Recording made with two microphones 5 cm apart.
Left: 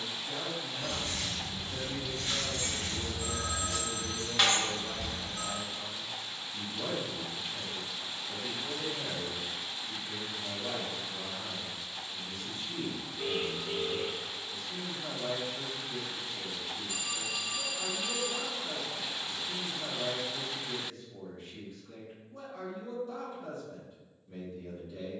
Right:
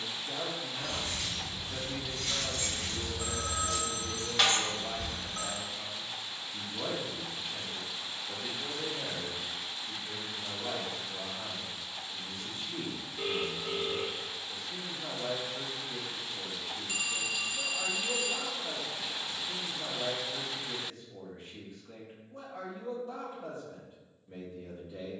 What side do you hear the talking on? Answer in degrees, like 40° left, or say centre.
30° right.